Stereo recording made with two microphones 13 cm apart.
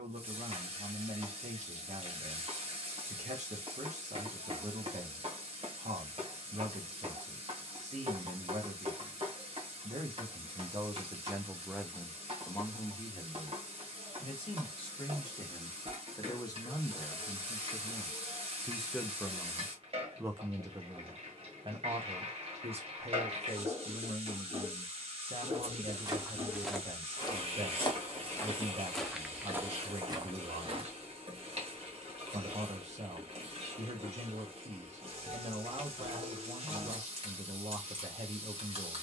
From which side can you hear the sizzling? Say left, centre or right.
right.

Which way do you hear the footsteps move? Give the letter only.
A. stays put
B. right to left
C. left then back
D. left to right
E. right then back
C.